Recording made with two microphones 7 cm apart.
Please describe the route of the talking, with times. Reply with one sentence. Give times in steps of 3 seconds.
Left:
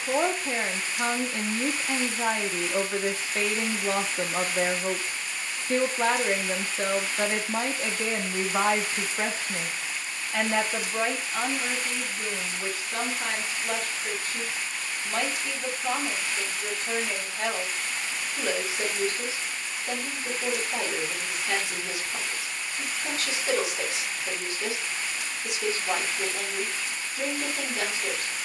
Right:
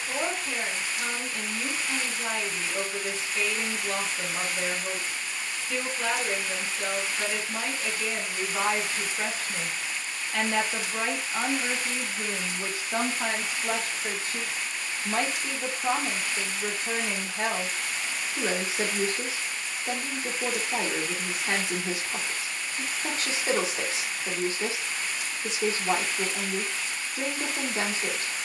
In this clip you hear the talking on the left from 0 s, in the centre from 9 s and on the right from 12 s.